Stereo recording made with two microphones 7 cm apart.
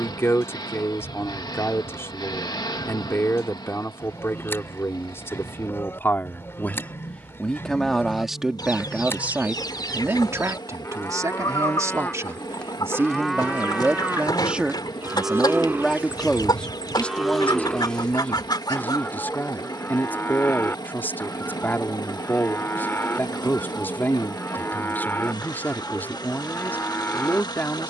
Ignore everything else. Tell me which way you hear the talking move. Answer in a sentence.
You can hear the talking go right and come back.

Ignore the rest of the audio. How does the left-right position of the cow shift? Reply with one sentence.
In this clip you hear the cow go right and come back.